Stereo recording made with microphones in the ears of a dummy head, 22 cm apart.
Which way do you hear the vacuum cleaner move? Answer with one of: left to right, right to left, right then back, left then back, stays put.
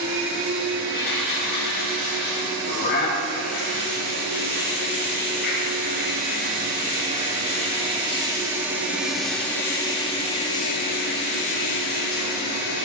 right to left.